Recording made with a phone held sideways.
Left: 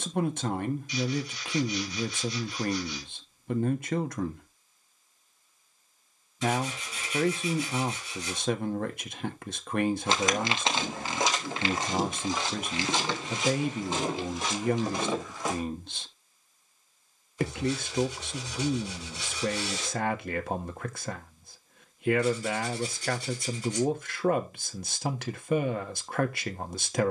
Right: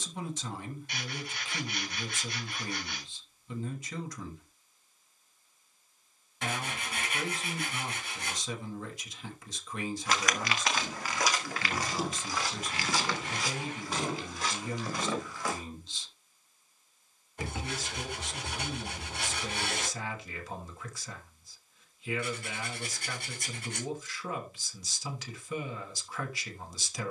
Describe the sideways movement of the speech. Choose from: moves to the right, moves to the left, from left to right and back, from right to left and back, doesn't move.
doesn't move.